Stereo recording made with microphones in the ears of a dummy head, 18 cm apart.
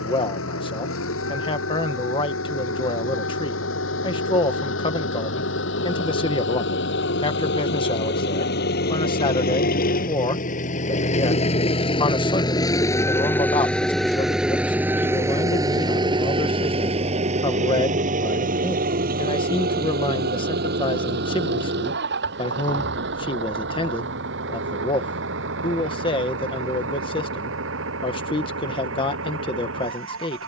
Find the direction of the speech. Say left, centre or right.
left.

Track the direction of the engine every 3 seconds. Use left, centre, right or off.
left, left, left, left, centre, right, right, right, right, right.